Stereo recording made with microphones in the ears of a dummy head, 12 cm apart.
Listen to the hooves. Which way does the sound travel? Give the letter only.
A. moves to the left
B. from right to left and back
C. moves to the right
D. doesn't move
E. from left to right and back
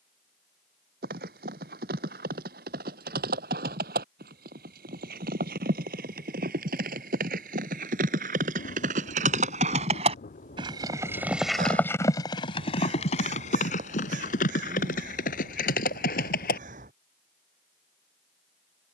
A.